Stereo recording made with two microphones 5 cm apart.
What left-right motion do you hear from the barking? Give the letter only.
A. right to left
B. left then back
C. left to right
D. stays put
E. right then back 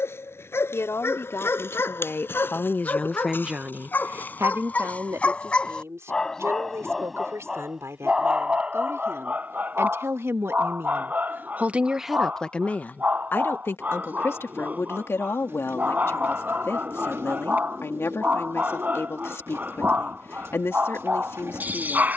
C.